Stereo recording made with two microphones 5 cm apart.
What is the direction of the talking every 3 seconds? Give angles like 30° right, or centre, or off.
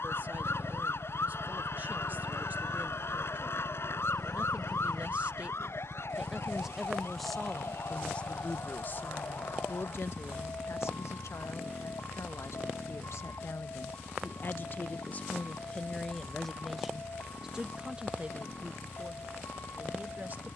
40° right, 30° right, 10° left, 60° left, 60° left, 10° left, 30° right.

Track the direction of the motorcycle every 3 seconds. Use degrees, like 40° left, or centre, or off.
20° right, centre, 20° left, 40° left, 40° left, 50° left, 50° left.